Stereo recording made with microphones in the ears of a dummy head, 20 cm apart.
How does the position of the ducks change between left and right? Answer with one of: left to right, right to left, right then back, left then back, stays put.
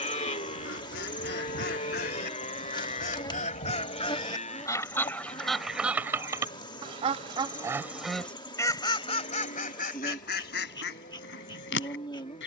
right then back.